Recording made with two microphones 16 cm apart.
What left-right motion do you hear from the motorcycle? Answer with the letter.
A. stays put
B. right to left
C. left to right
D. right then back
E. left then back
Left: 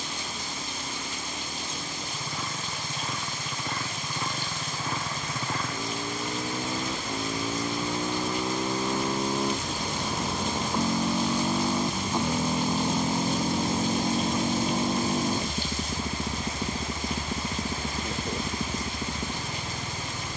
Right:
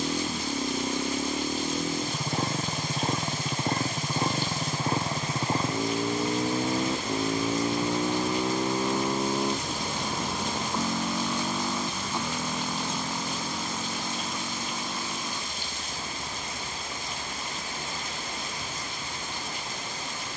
B.